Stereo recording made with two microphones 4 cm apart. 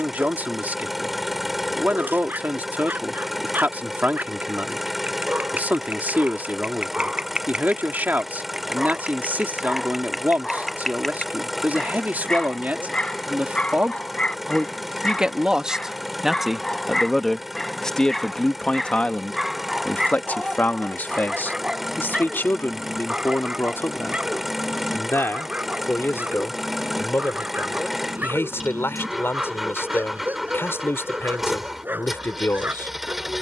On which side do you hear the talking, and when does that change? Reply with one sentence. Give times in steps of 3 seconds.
In this clip you hear the talking on the right from 0 s, in the centre from 15 s and on the left from 18 s.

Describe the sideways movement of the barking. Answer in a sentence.
You can hear the barking move from right to left and back again.